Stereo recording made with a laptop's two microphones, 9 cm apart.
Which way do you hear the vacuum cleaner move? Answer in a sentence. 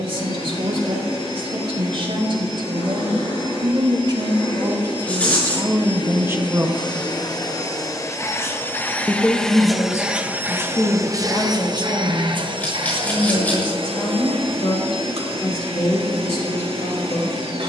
In this clip you hear the vacuum cleaner move from left to right.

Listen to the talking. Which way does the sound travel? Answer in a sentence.
In this clip you hear the talking move from right to left.